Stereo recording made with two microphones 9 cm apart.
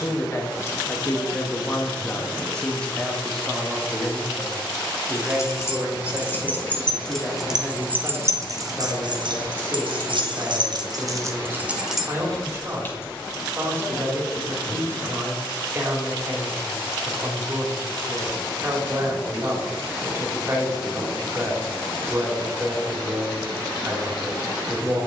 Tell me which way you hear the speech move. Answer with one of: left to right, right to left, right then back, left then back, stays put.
left to right.